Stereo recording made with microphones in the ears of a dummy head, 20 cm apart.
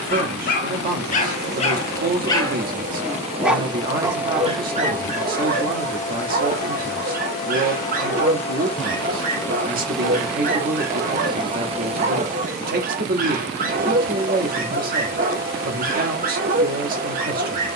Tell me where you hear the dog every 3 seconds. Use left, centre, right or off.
left, right, right, right, right, right.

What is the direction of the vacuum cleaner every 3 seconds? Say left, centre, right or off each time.
right, centre, left, centre, right, right.